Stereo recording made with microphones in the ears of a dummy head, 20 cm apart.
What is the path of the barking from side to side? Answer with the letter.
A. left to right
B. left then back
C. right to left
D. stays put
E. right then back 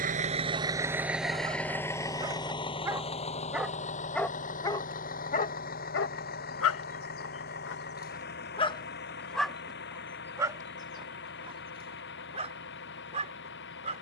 B.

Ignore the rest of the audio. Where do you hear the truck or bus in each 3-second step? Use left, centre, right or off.
centre, left, left, left, left.